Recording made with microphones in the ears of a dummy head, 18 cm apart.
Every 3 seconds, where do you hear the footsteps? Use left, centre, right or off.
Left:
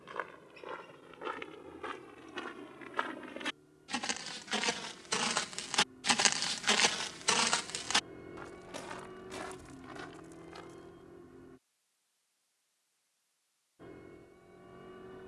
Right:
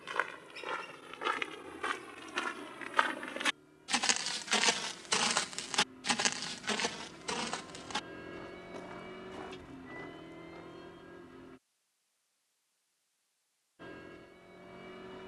right, right, left, left, off.